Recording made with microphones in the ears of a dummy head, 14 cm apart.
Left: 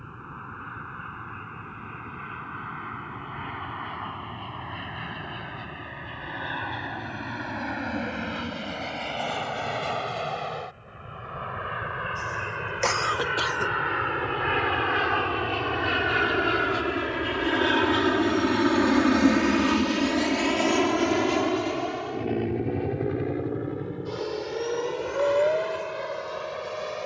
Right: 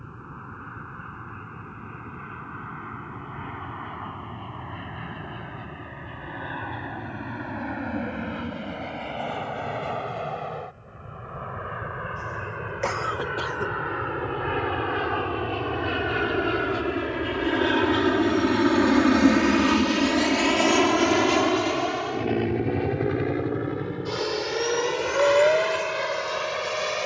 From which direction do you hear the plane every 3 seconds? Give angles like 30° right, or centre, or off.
80° left, 80° left, 70° left, 70° left, 50° left, 30° left, centre, 30° right, 50° right.